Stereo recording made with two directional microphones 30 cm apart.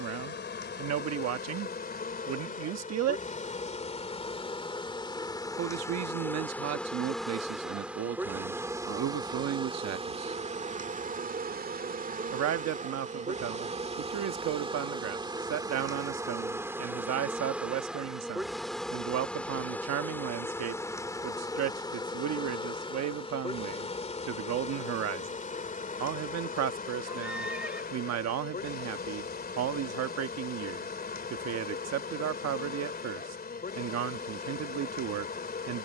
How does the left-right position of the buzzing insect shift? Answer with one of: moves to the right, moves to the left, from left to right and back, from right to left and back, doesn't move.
from left to right and back.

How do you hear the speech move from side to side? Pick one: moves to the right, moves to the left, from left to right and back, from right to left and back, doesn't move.
doesn't move.